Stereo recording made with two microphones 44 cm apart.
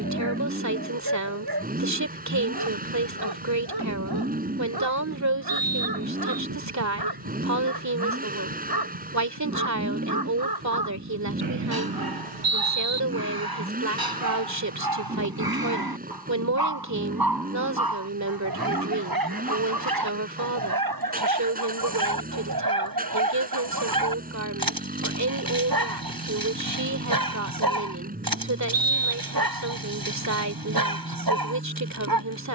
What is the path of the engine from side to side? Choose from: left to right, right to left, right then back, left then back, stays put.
stays put.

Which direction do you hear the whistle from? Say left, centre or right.
right.